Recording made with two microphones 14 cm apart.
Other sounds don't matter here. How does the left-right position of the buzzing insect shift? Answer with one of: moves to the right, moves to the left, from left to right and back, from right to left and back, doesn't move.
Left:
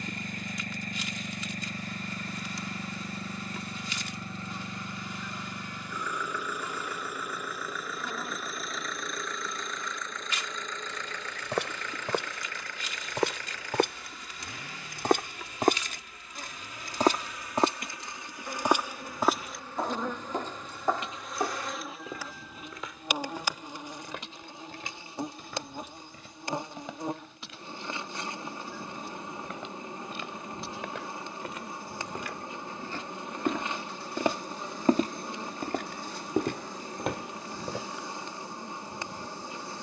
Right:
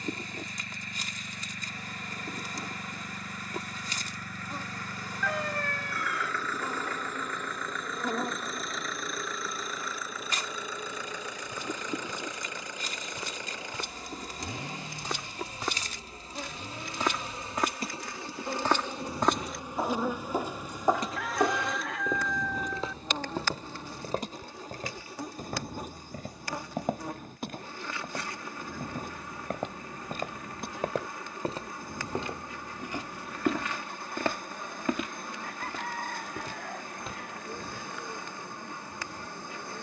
moves to the left.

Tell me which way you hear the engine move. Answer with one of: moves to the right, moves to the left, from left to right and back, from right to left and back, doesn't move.
moves to the right.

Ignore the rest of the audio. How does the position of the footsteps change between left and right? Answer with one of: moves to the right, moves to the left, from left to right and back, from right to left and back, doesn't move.
from left to right and back.